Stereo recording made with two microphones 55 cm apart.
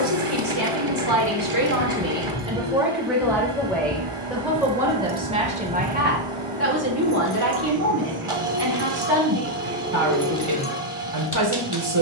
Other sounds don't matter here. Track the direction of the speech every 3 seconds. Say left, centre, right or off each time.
right, centre, right, right.